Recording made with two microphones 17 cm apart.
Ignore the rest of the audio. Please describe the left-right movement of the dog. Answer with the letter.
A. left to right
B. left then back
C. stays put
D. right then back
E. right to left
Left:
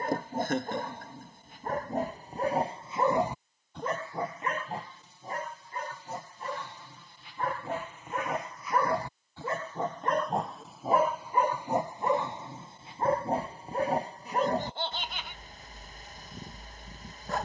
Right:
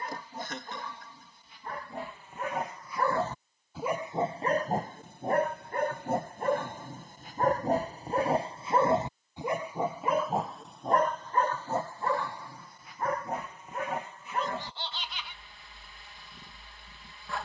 D.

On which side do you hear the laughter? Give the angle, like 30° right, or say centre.
50° left.